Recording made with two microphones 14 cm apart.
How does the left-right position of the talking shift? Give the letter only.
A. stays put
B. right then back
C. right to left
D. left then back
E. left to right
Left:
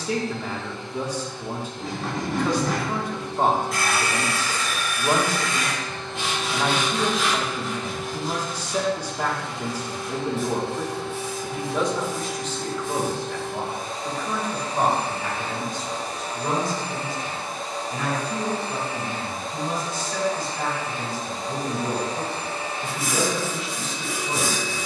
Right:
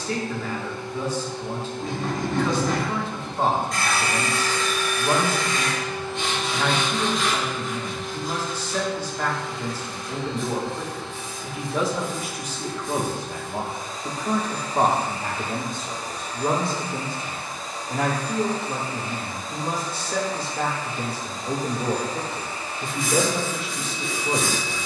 E.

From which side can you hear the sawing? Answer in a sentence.
You can hear the sawing in the centre.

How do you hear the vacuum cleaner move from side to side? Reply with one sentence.
You can hear the vacuum cleaner move from right to left.